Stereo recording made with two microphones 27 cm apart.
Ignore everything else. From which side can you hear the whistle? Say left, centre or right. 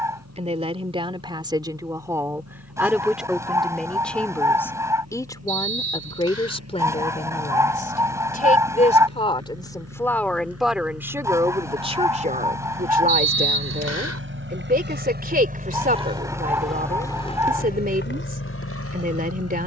right.